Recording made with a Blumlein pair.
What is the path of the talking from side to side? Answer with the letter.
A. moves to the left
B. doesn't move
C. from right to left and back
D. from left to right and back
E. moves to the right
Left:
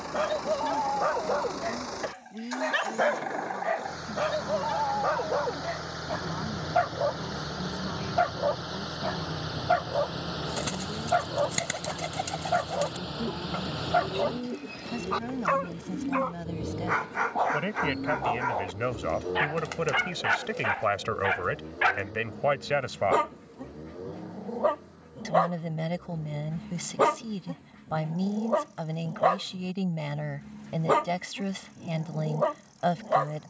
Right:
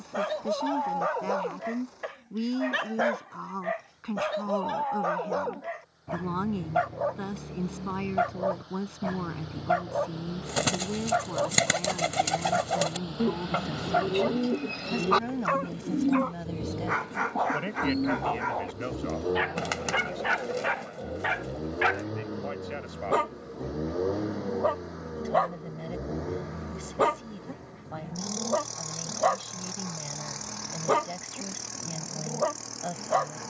A.